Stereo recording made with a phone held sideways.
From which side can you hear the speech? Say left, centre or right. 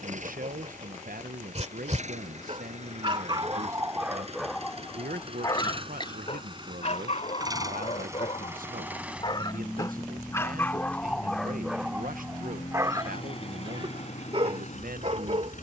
right.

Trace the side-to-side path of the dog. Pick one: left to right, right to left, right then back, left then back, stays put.
left then back.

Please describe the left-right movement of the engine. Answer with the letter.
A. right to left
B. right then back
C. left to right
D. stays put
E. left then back
A.